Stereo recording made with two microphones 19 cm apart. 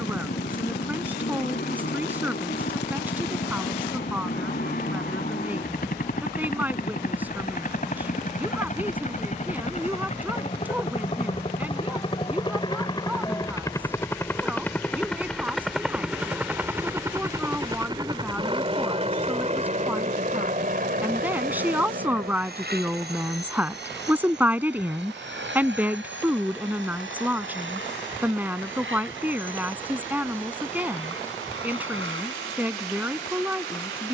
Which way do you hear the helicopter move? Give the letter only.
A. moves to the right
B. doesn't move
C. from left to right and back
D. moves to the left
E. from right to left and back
A.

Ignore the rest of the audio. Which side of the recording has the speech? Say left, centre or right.
centre.